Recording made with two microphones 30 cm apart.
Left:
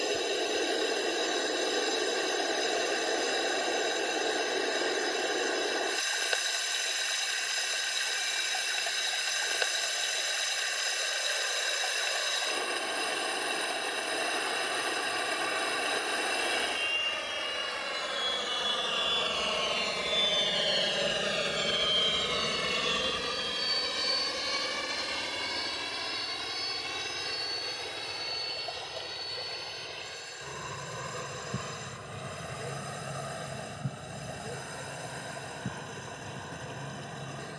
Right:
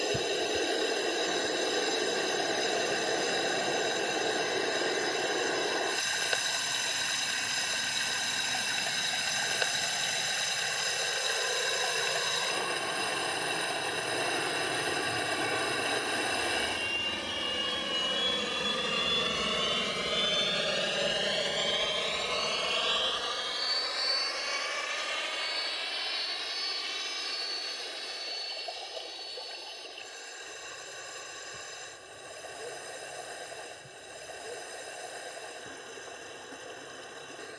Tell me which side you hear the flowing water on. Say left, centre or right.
centre.